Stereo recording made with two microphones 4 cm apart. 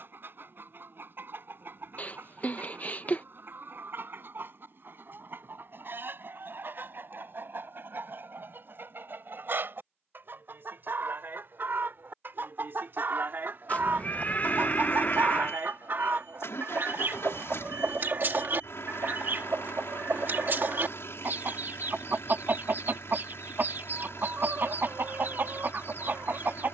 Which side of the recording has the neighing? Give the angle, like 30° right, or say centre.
40° left.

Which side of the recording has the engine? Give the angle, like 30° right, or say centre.
70° left.